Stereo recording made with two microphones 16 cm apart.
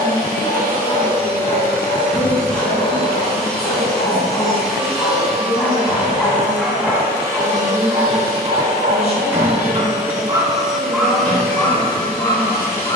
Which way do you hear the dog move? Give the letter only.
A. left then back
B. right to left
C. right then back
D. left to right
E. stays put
C.